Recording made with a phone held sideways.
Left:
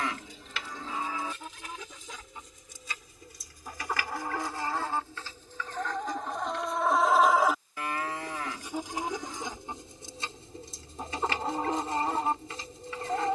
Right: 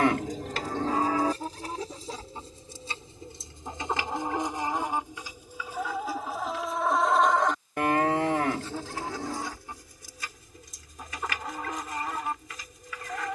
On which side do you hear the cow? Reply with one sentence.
You can hear the cow on the right.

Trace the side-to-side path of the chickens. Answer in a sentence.
You can hear the chickens move to the left.